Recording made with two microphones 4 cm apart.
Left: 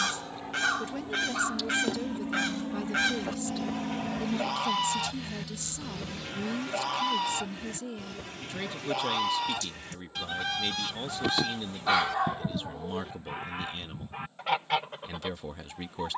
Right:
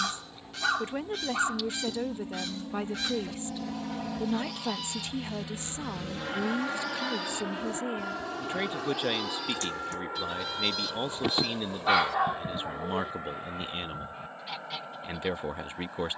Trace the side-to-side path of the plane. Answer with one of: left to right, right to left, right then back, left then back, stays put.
left to right.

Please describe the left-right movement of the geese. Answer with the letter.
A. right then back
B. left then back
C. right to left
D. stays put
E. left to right
D.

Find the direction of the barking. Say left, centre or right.
centre.